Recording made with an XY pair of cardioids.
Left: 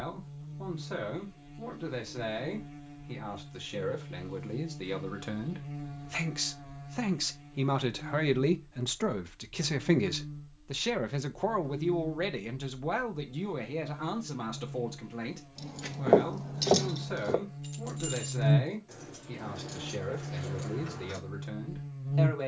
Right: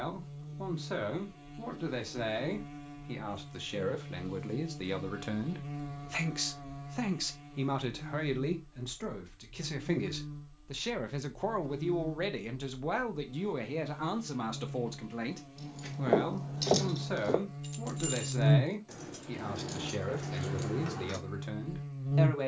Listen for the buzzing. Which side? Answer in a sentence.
You can hear the buzzing on the right.